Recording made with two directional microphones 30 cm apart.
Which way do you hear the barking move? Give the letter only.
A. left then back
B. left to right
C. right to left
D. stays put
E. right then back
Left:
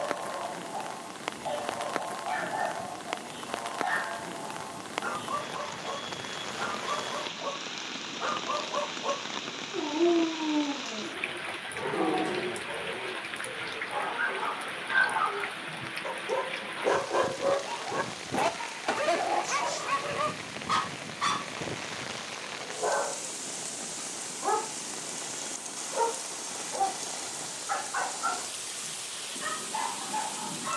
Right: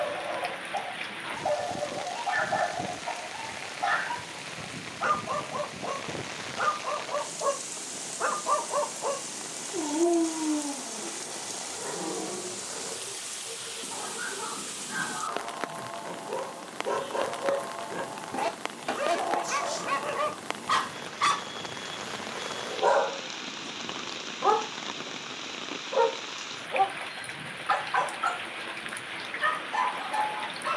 A.